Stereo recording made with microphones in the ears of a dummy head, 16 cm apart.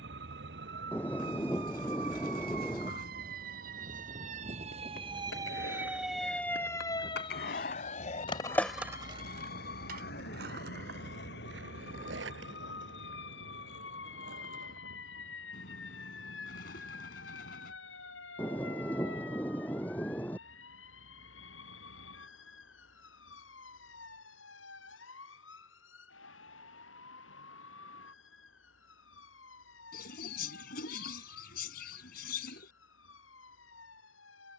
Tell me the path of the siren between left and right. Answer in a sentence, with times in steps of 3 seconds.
You can hear the siren on the right from 0 s and on the left from 6 s.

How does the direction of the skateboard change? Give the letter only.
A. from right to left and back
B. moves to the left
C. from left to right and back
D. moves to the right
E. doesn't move
D.